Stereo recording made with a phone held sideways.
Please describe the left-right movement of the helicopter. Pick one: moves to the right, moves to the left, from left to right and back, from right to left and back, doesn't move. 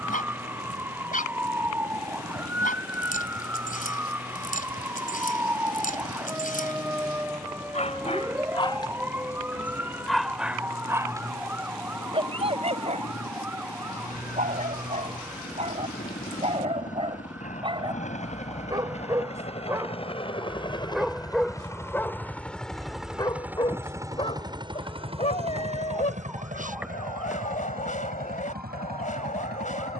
moves to the right.